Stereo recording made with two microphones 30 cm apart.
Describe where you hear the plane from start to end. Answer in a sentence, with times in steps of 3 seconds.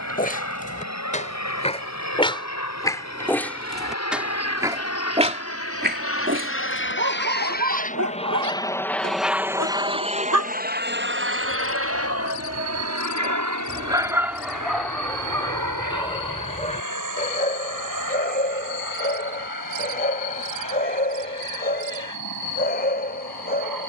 In this clip you hear the plane on the left from 0 s and on the right from 9 s.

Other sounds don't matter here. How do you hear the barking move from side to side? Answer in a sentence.
In this clip you hear the barking move from left to right and back again.